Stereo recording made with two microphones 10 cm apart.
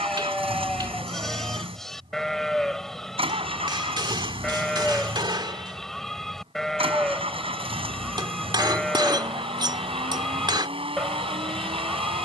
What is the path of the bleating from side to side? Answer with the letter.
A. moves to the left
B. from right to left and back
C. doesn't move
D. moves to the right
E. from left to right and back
C.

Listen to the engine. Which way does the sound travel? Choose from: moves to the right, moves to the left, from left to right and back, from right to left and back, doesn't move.
doesn't move.